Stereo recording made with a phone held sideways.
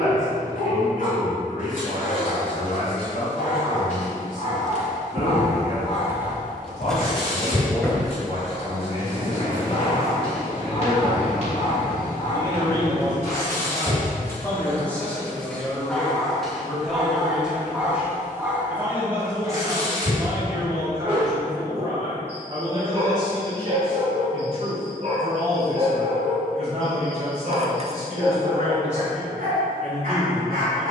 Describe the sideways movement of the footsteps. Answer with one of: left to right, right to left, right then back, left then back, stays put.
right to left.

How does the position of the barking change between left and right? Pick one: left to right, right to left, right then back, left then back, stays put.
left to right.